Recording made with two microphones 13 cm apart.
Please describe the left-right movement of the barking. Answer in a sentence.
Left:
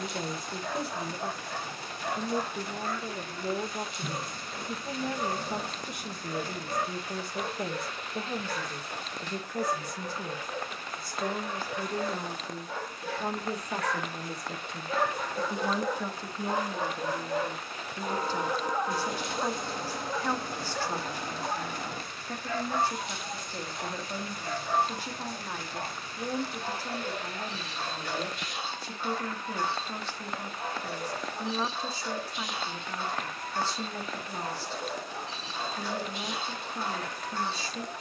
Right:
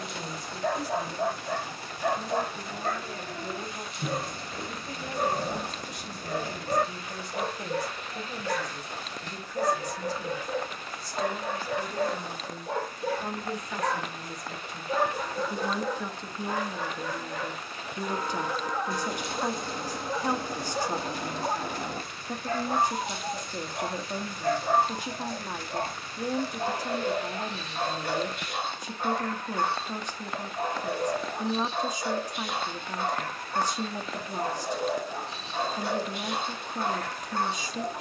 You can hear the barking move from right to left and back again.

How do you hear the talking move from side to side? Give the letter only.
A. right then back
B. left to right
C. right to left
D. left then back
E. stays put
B.